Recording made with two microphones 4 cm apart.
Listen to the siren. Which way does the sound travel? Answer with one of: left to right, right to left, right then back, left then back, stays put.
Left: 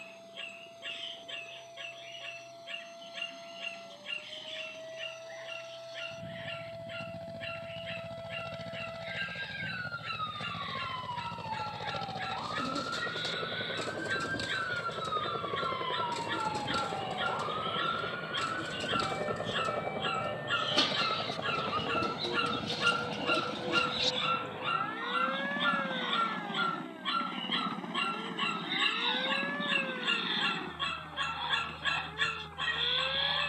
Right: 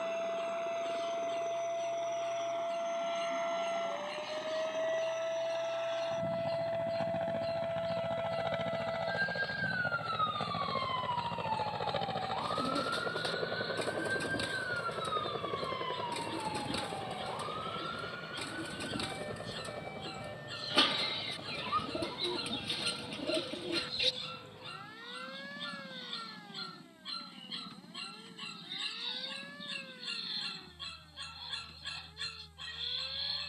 right to left.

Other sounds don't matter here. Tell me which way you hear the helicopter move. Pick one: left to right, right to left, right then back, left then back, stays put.
right to left.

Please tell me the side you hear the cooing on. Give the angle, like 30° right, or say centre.
10° right.